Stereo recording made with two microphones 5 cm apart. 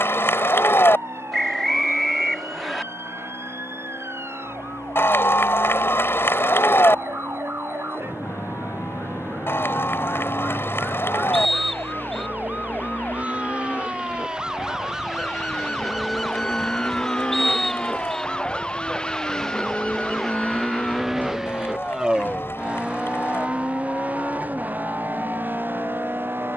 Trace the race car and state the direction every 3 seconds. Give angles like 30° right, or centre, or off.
70° left, 60° left, 60° left, 50° left, 50° left, 30° left, 10° left, 20° right, 40° right.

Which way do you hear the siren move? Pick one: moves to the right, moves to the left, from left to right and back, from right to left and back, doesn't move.
moves to the left.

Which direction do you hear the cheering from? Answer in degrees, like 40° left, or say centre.
60° left.